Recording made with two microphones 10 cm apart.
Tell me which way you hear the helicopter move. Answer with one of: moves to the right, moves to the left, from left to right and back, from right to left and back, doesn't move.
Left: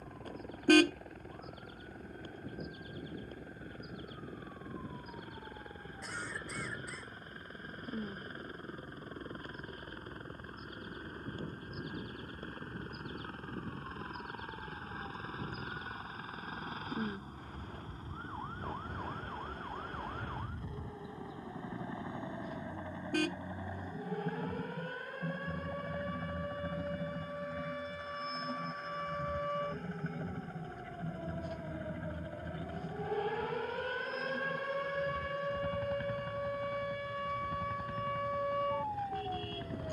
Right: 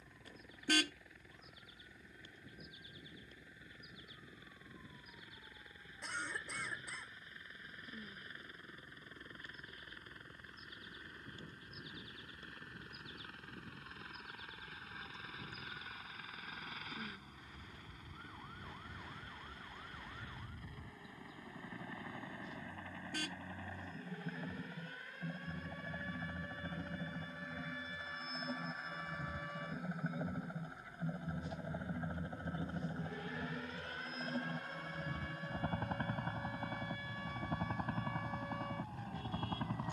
moves to the right.